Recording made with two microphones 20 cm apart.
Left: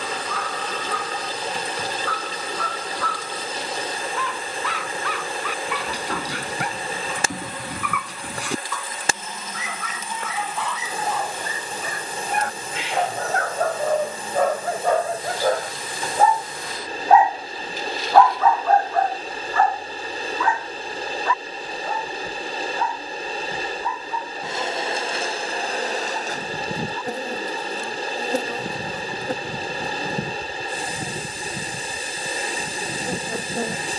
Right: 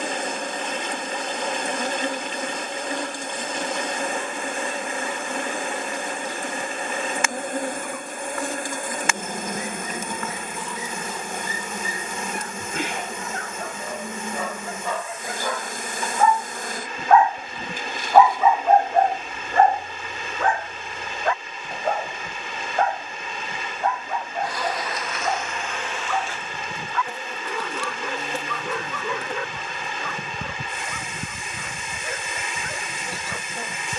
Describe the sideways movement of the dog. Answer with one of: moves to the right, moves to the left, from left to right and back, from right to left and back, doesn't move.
moves to the right.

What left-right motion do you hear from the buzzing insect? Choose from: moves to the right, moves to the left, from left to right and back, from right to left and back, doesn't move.
moves to the left.